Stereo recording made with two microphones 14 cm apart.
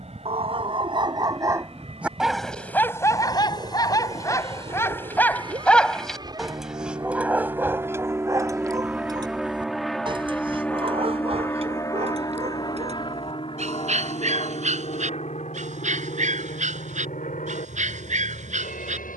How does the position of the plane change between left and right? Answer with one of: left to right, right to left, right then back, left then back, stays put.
right to left.